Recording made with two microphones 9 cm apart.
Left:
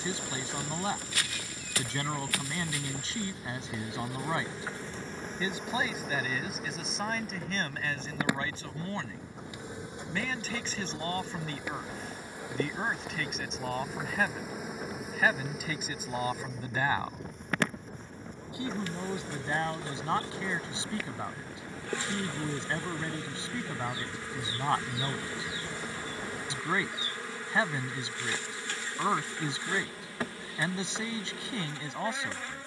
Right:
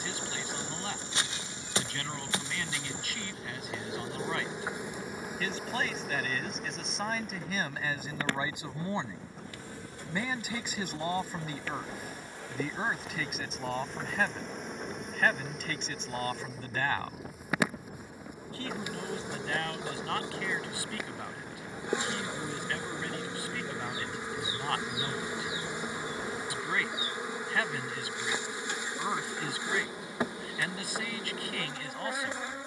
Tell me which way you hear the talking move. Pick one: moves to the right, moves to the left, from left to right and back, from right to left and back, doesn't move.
from left to right and back.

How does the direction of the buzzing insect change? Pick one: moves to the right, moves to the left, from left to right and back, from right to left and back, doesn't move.
from right to left and back.